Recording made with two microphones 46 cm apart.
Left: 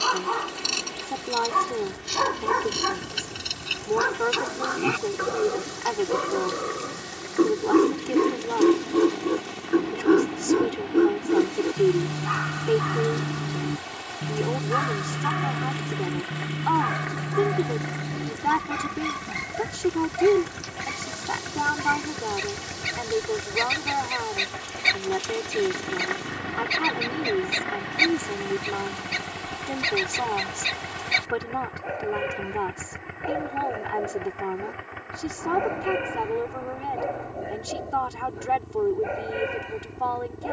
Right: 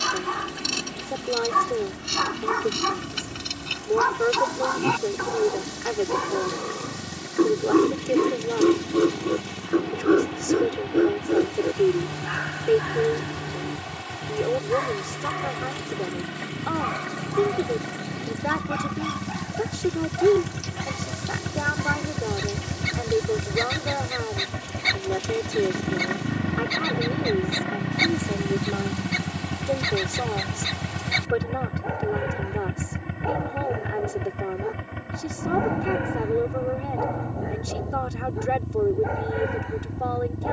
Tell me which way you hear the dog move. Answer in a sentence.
In this clip you hear the dog move to the left.